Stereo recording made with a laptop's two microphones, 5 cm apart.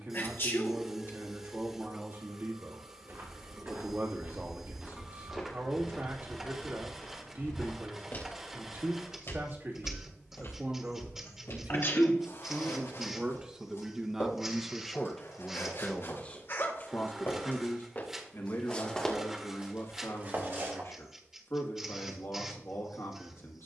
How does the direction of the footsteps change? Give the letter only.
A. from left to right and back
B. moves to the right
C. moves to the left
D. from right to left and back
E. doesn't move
D.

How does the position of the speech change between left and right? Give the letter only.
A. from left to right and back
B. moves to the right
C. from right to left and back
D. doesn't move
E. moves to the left
E.